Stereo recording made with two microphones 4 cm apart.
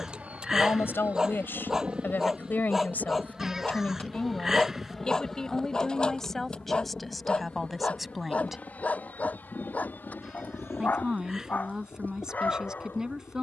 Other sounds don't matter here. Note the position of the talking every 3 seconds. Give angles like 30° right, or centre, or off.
60° left, 30° left, centre, 20° right, 20° right.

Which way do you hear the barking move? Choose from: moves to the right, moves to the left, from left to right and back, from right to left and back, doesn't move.
moves to the left.